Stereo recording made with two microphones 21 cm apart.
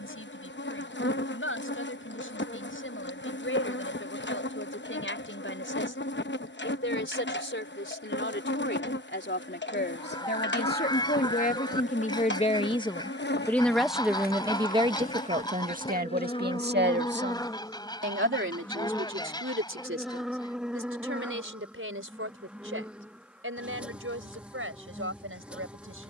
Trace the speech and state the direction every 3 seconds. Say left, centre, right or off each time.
left, left, left, left, centre, right, right, right, right.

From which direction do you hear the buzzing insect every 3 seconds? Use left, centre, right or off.
left, left, left, left, left, left, centre, centre, centre.